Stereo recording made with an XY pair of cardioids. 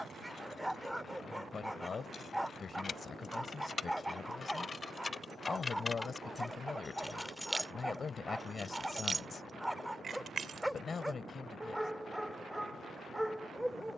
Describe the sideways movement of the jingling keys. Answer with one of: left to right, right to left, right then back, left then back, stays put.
left to right.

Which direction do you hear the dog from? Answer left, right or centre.
centre.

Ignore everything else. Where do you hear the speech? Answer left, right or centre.
left.